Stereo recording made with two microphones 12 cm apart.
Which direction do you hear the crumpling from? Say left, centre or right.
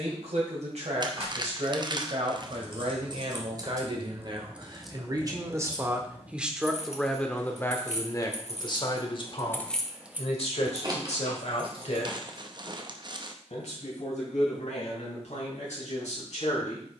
right.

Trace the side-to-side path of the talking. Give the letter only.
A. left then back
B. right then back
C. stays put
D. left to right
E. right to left
E.